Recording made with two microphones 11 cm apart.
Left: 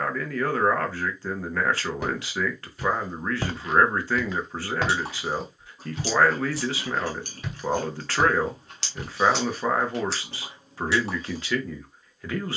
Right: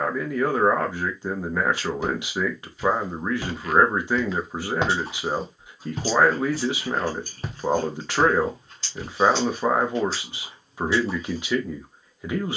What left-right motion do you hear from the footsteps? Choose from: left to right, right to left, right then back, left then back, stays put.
right then back.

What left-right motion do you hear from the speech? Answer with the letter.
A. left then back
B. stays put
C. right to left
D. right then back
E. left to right
B.